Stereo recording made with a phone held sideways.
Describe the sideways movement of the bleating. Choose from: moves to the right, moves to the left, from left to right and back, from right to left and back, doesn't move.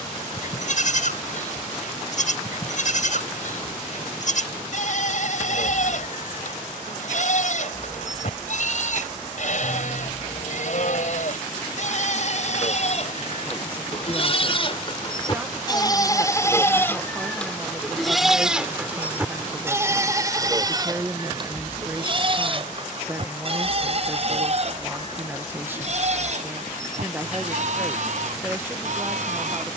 moves to the right.